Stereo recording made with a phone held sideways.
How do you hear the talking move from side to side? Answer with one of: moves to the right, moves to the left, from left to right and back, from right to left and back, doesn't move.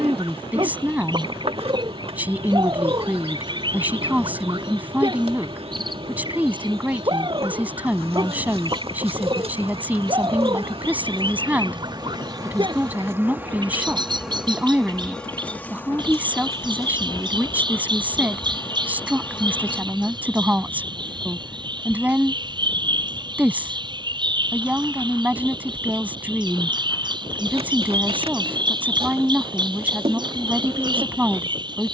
doesn't move.